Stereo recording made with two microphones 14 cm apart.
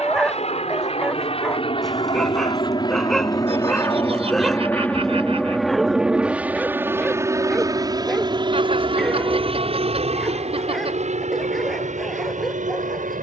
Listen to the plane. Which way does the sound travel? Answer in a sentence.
In this clip you hear the plane go from the left side to the right.